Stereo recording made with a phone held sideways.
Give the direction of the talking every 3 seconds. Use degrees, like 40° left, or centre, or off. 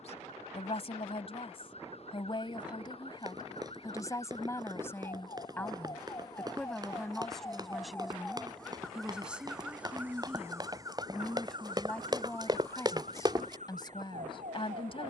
40° left, 20° left, centre, centre, 30° left.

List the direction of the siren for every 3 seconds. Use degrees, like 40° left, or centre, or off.
50° left, 40° left, 20° left, 20° right, 50° right.